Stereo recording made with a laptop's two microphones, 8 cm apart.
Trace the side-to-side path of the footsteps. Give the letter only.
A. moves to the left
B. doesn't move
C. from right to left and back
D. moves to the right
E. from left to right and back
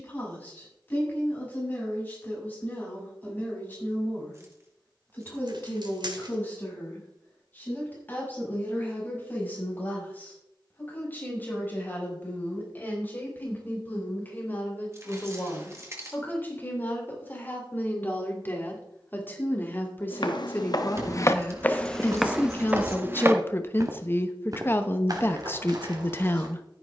D.